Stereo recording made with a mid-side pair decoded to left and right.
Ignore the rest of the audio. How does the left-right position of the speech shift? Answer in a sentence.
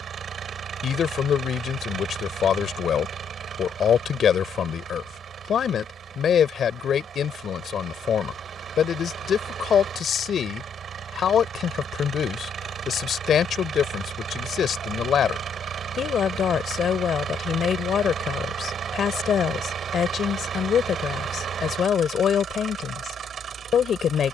In this clip you hear the speech stay put.